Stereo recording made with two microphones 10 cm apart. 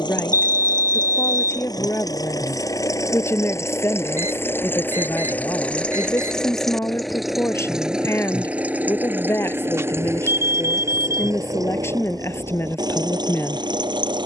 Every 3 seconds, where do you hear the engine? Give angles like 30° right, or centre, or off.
40° left, 20° left, centre, 30° right, 50° right.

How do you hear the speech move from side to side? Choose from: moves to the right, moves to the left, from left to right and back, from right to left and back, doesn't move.
doesn't move.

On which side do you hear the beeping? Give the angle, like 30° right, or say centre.
30° right.